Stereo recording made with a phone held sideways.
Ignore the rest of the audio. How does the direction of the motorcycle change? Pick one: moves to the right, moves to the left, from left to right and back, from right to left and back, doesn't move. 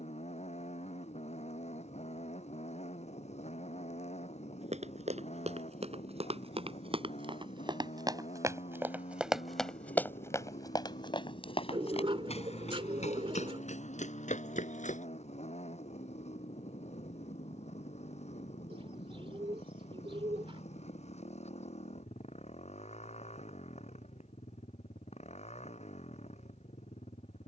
doesn't move.